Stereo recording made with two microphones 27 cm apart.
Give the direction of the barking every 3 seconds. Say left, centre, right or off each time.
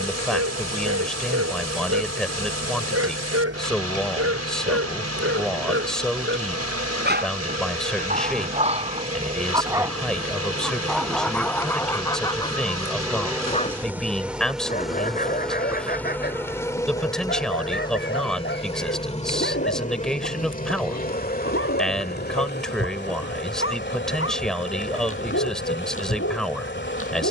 right, right, right, centre, left, left, left, left, left.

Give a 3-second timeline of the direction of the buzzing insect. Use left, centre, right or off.
right, right, right, right, centre, centre, left, left, left.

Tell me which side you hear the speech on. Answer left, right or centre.
centre.